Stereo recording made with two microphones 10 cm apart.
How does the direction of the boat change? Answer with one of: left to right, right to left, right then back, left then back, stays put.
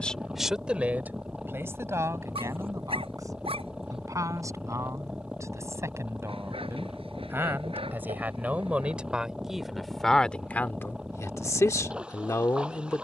stays put.